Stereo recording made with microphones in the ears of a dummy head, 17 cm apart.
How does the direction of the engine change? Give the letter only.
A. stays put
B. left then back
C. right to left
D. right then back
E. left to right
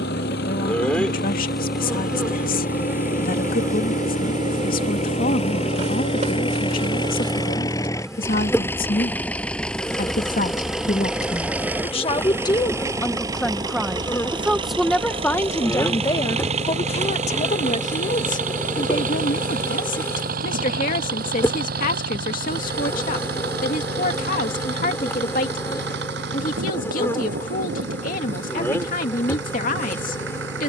E.